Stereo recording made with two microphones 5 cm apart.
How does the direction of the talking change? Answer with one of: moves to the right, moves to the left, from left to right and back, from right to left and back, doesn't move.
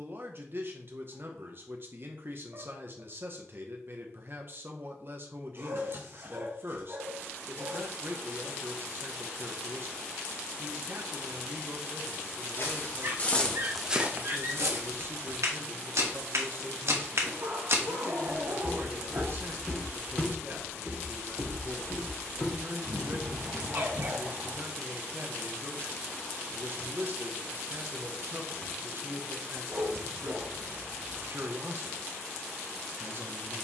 doesn't move.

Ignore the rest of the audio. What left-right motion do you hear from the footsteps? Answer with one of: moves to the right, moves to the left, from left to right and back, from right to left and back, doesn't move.
from left to right and back.